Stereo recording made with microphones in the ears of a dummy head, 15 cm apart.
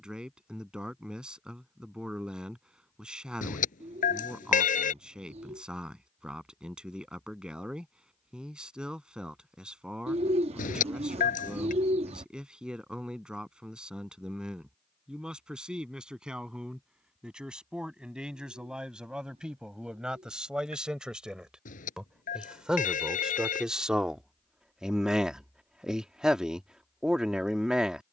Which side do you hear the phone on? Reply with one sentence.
In this clip you hear the phone on the left.